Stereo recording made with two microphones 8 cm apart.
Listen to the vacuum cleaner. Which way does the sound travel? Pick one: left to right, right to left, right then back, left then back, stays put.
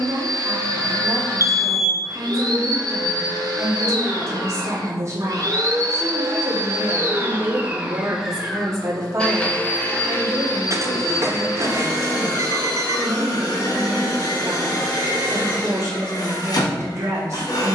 right to left.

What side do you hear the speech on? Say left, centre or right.
right.